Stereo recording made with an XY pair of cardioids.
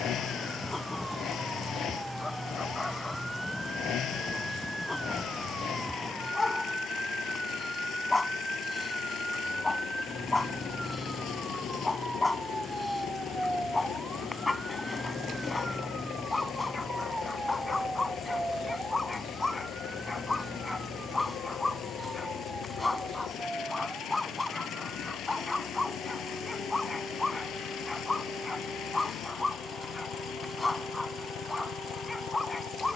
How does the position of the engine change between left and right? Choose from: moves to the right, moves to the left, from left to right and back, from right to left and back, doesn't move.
doesn't move.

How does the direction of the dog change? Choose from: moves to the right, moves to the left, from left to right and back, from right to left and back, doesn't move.
doesn't move.